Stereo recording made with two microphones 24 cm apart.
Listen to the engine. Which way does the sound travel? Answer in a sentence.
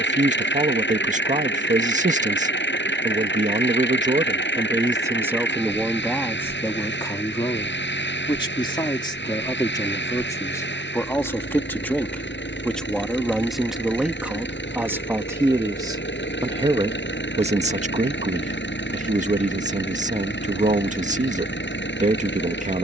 In this clip you hear the engine stay put.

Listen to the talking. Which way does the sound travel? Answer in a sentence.
In this clip you hear the talking go left and come back.